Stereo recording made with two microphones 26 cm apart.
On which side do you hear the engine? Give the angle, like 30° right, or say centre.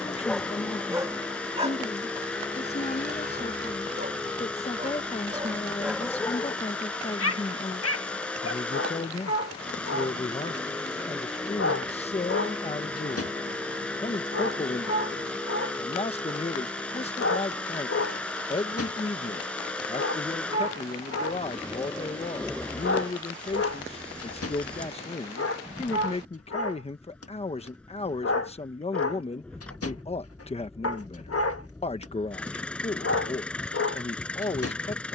centre.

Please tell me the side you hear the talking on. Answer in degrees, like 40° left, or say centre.
20° left.